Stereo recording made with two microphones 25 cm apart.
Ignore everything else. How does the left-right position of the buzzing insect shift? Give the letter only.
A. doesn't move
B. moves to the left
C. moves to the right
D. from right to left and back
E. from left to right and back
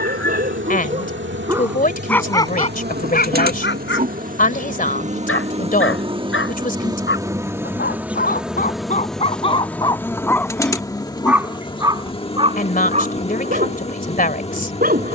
B.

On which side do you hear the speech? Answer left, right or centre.
left.